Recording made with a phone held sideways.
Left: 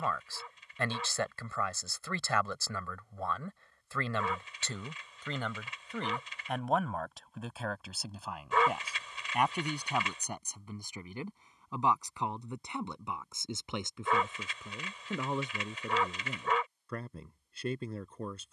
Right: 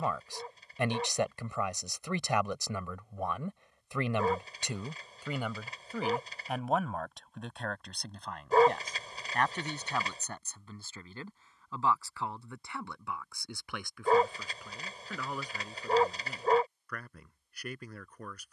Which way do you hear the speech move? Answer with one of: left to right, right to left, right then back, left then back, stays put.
right to left.